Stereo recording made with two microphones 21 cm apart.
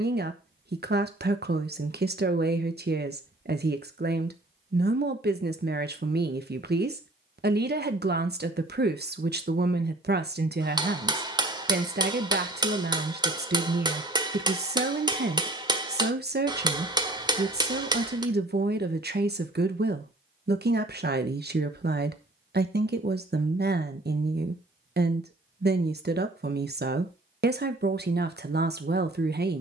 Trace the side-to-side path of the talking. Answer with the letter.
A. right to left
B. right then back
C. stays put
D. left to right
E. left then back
C.